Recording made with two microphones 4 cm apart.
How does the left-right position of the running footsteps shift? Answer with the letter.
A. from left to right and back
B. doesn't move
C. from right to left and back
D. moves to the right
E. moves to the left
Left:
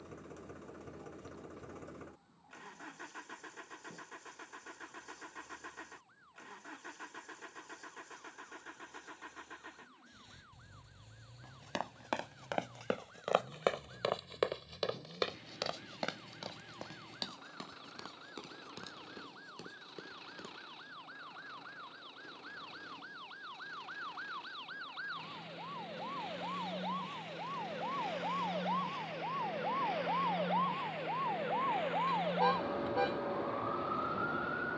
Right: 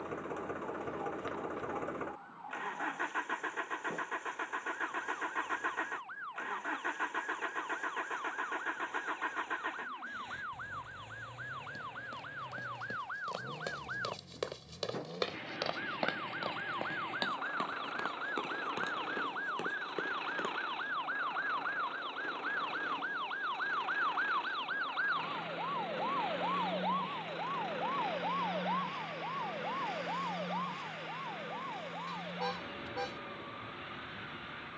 D.